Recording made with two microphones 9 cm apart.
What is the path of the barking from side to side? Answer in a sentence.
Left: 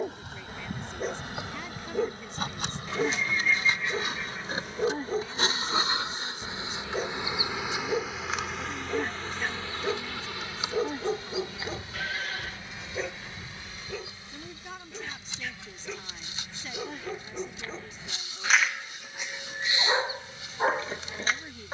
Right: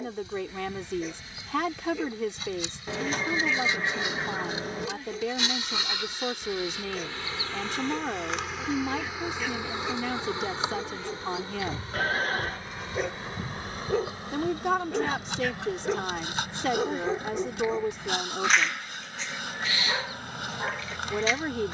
In this clip you hear the barking move from left to right and back again.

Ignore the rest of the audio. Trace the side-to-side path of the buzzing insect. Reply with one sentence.
You can hear the buzzing insect move from left to right.